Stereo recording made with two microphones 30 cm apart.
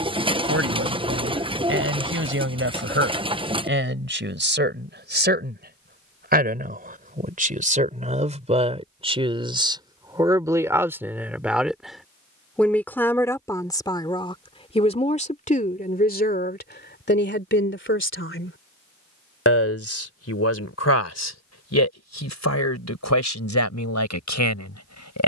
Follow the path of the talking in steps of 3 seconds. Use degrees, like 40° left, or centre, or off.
40° right, 40° right, 30° right, 10° right, 10° left, 30° left, 50° left, 60° left, 70° left.